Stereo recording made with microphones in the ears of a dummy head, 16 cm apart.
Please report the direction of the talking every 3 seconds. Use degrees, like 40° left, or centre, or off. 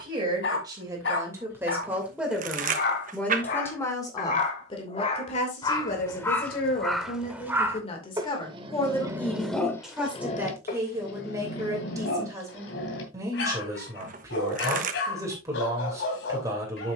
10° right, 30° left, 40° left, 10° right, 20° right, 20° right.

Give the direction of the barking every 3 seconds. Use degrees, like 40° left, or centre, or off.
60° left, 40° left, 10° right, 30° left, 70° left, 70° left.